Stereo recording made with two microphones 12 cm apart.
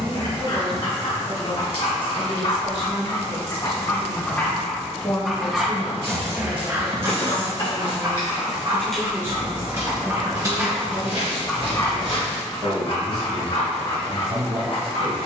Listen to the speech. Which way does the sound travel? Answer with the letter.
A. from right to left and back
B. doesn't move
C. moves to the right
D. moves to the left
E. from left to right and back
C.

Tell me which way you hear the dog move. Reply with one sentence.
You can hear the dog move from left to right and back again.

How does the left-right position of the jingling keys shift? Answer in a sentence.
In this clip you hear the jingling keys move to the right.